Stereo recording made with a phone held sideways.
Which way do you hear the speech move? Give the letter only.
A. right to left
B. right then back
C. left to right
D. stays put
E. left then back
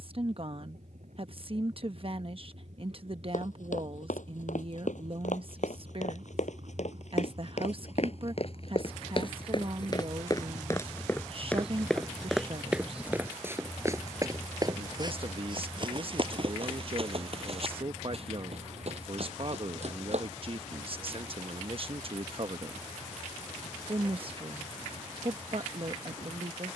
D.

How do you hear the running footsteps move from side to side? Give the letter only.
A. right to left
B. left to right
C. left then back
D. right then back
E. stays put
B.